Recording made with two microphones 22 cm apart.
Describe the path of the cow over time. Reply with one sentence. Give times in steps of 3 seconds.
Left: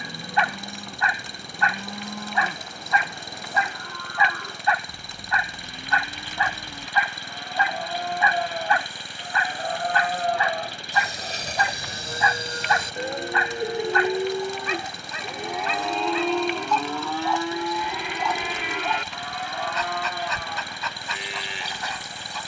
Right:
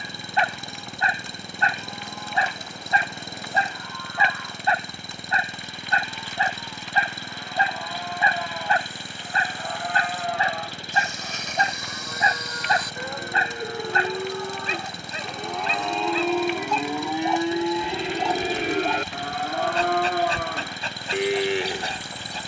In this clip you hear the cow on the left from 0 s, in the centre from 15 s and on the right from 18 s.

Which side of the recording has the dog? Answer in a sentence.
In this clip you hear the dog on the right.